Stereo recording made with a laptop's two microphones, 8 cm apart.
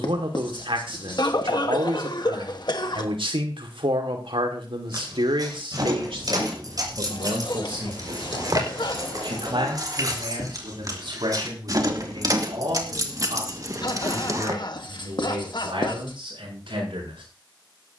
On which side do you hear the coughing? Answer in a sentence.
In this clip you hear the coughing on the left.